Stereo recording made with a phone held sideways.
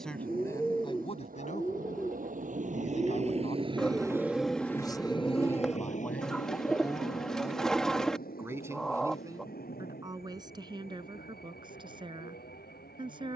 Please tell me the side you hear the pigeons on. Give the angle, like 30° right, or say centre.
centre.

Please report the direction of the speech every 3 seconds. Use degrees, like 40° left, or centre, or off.
40° left, 30° left, 10° right, 30° right, 30° right.